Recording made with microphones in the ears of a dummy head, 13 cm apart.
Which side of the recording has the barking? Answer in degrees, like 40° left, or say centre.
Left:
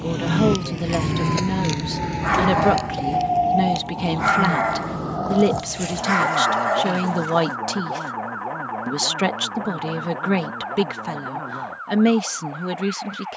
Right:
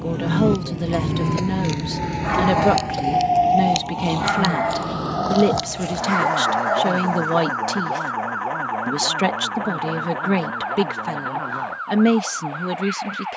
30° left.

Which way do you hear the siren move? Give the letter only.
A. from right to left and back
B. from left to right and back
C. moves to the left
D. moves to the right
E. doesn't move
D.